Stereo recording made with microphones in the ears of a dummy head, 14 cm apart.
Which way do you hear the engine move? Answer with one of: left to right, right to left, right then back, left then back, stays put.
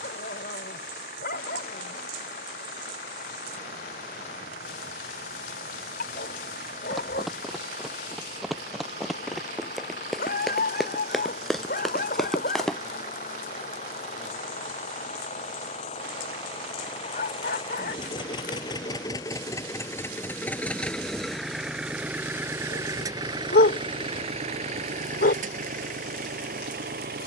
left to right.